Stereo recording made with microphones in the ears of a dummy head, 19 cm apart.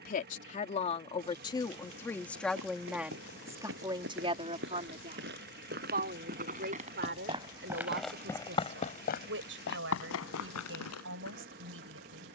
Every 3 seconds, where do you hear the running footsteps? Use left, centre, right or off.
right, right, centre, left.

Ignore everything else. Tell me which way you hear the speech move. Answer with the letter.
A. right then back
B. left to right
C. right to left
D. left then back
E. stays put
B.